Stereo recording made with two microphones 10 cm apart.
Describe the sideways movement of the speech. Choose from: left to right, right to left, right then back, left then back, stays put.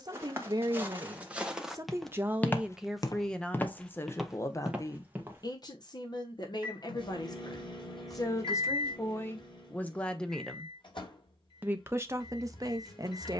left then back.